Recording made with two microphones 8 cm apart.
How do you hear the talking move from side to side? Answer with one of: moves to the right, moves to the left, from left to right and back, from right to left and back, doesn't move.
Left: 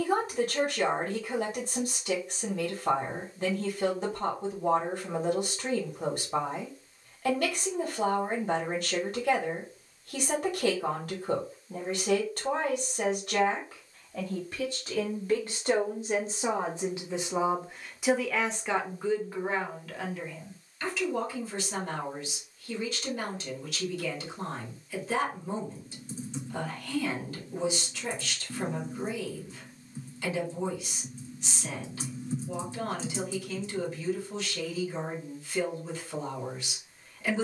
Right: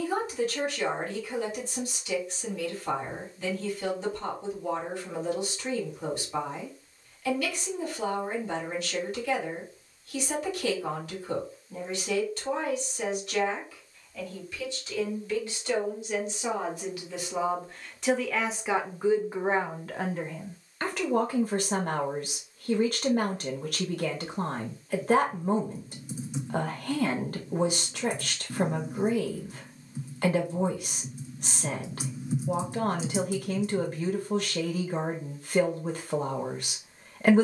moves to the right.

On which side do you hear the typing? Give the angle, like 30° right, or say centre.
10° right.